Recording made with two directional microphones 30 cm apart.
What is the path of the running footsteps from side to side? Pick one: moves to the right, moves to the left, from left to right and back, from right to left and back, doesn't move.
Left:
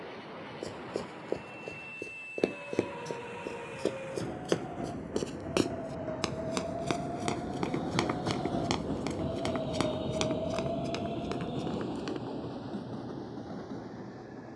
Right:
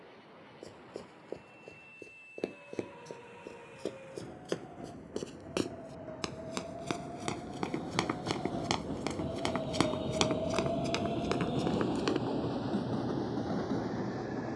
moves to the right.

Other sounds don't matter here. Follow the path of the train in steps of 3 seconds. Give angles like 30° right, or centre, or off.
60° left, 60° left, 40° left, centre, 50° right.